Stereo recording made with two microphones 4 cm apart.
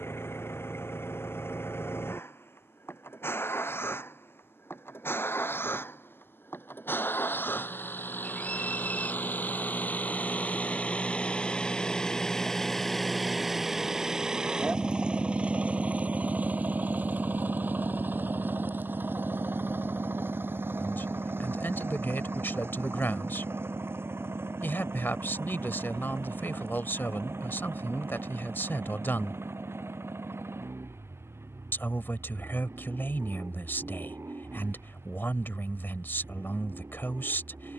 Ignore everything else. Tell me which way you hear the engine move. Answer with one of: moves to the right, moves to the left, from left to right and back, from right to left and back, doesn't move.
moves to the right.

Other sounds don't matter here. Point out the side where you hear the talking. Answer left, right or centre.
left.